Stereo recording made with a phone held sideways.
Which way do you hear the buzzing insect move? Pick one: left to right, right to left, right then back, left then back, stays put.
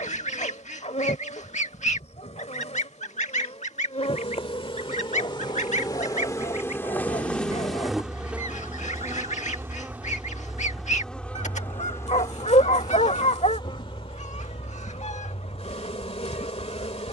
right then back.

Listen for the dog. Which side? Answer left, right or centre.
left.